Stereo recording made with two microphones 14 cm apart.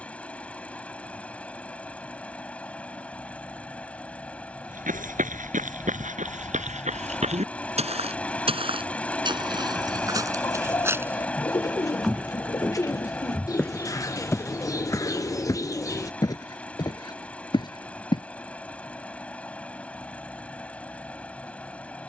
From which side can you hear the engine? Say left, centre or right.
centre.